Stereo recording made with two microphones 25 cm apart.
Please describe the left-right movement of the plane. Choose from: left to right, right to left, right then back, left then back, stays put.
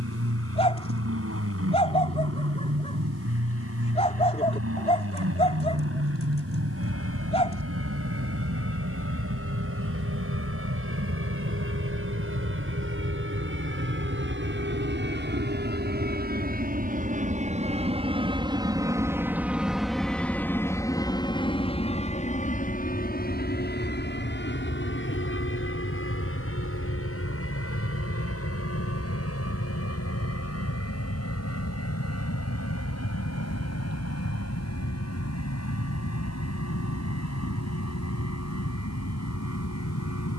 right to left.